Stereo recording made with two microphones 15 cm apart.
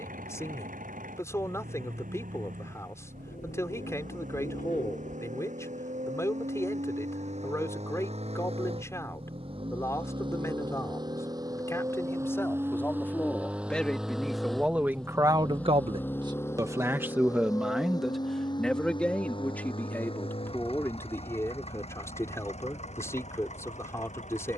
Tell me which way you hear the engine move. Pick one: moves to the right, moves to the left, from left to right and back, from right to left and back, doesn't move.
moves to the left.